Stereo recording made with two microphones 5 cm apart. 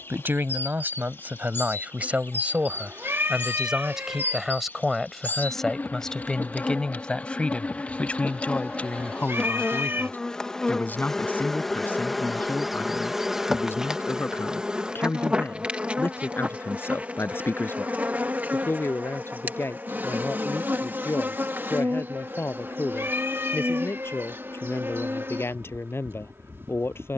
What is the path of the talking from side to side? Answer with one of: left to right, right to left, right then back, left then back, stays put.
right to left.